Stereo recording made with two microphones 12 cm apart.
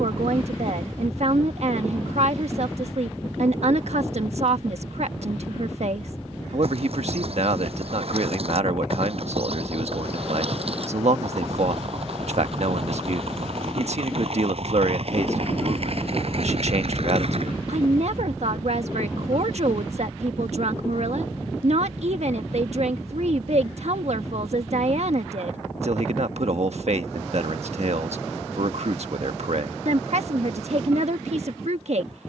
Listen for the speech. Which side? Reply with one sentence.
In this clip you hear the speech on the right.